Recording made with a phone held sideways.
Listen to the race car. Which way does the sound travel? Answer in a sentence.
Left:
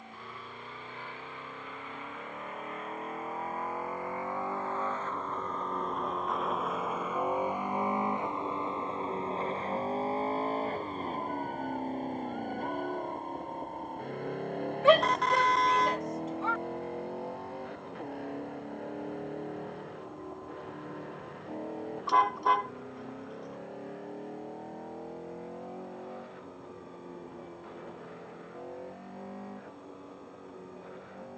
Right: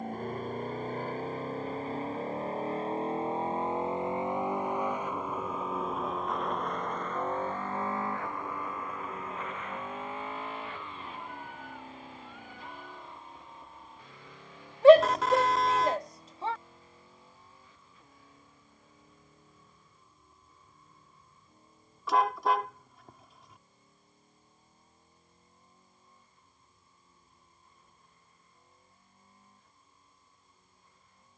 You can hear the race car move from right to left.